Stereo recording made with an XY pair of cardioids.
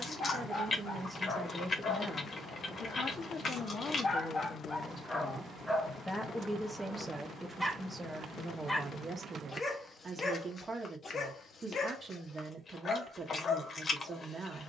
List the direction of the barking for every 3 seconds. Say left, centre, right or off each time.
left, left, centre, left, left.